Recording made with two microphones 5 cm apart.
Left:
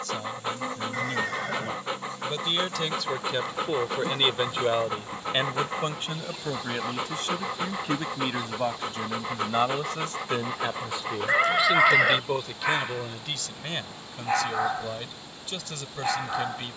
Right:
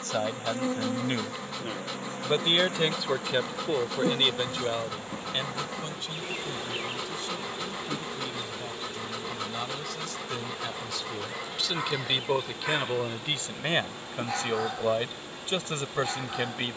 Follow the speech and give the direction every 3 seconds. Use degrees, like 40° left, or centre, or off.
40° right, 20° left, 60° left, 30° left, 20° right, 30° right.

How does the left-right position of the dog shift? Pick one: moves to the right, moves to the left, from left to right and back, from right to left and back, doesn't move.
doesn't move.